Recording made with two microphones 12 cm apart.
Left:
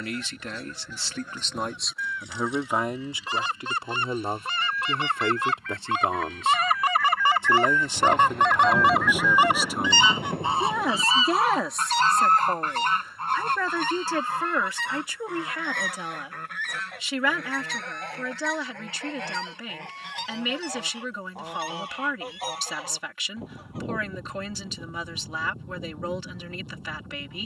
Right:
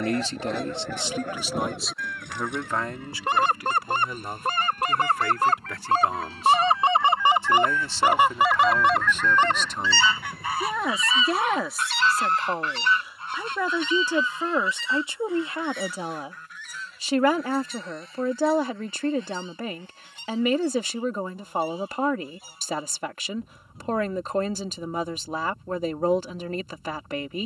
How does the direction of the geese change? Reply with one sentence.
In this clip you hear the geese move to the left.